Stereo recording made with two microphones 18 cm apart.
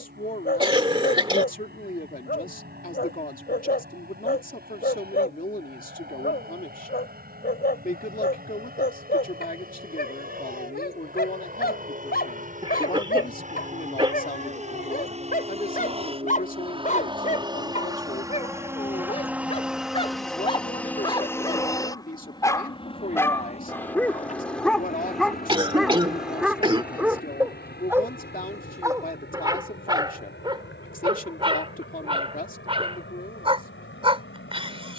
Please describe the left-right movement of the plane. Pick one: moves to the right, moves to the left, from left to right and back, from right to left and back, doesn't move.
moves to the left.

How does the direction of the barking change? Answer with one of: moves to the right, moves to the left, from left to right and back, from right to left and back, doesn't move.
moves to the right.